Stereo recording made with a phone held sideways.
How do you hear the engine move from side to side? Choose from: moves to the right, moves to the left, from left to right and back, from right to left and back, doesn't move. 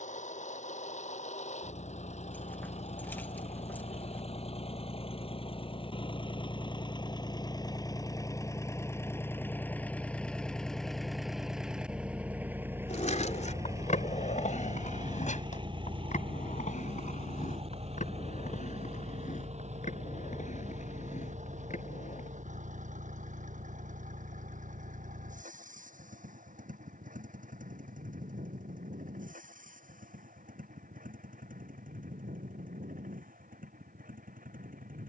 moves to the right.